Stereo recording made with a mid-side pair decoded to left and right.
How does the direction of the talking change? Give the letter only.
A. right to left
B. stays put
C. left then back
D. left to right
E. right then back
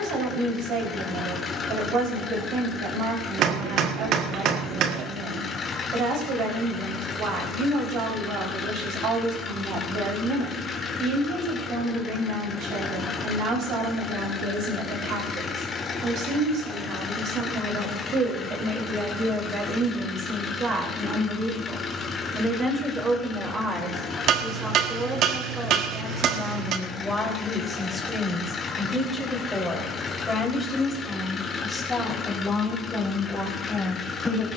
A.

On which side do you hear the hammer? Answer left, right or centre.
right.